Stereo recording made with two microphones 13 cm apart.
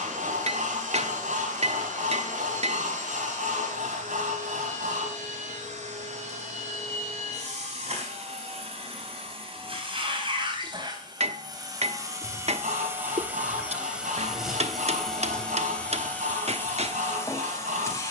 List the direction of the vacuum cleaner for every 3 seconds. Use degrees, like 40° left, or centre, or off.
70° right, 70° right, 60° right, 40° right, 10° right, 20° left.